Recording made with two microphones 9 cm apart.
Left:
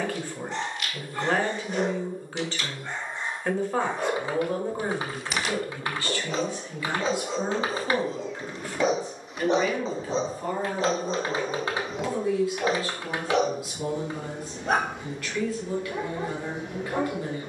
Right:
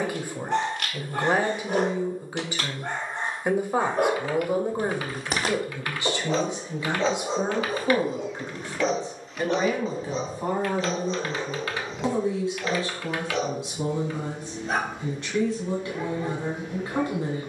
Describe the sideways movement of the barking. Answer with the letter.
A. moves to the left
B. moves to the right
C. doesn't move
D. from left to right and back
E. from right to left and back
A.